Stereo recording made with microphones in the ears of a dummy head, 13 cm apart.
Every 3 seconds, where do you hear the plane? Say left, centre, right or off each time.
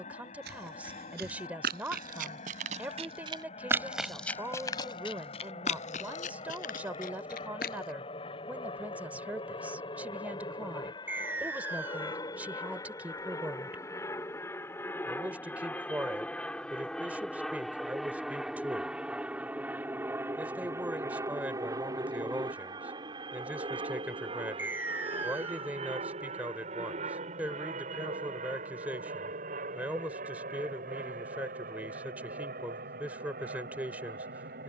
left, left, left, left, left, centre, centre, right, right, right, right, right.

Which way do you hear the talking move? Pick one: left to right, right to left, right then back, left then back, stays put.
stays put.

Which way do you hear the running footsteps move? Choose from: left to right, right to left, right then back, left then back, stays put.
right to left.